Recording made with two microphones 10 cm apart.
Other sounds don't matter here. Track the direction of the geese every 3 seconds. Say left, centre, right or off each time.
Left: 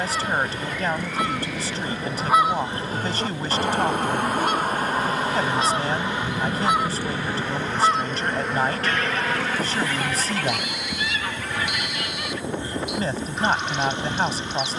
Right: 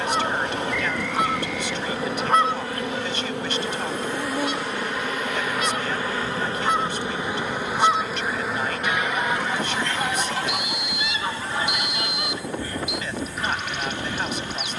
centre, left, centre, right, right.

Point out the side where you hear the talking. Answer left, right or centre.
left.